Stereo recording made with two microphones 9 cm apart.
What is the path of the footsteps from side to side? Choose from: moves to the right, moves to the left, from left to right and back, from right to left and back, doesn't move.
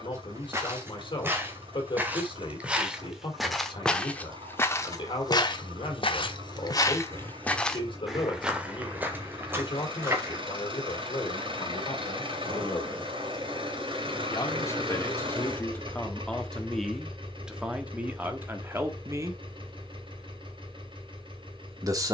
from right to left and back.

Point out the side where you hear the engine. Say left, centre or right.
right.